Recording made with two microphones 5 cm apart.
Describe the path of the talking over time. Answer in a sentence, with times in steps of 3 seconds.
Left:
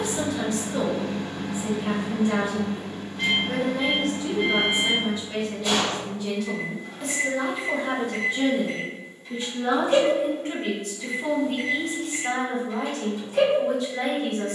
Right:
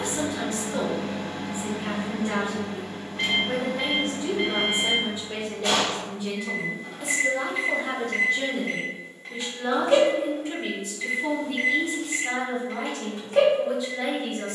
You can hear the talking on the right from 0 s, in the centre from 6 s and on the left from 9 s.